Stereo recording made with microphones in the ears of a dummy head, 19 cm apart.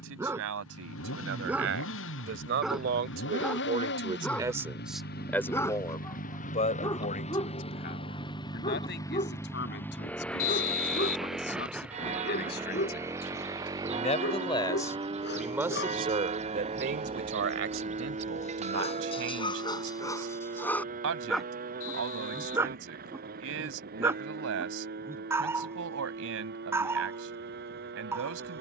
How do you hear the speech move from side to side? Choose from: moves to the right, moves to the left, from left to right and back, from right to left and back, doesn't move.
from right to left and back.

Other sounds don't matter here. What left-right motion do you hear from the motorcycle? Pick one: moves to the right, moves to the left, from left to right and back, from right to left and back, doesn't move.
moves to the right.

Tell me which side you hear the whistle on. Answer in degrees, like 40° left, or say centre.
60° left.